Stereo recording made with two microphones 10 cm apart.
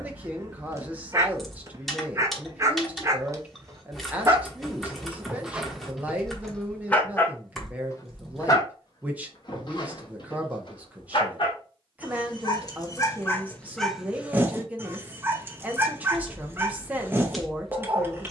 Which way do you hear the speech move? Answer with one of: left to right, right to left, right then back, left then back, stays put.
stays put.